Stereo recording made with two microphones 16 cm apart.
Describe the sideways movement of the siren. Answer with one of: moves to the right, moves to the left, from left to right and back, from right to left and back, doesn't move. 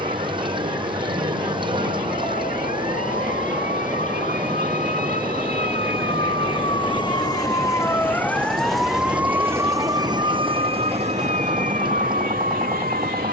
moves to the right.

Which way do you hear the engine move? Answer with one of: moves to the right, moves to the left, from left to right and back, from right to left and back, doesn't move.
doesn't move.